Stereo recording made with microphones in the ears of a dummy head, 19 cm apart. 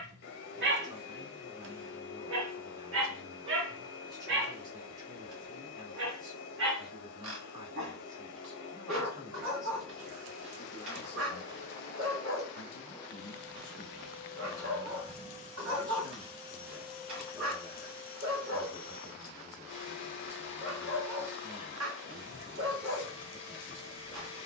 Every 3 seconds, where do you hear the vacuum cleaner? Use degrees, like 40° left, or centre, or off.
60° left, 60° left, 60° left, 60° left, 10° left, 10° right, 60° left, 60° left.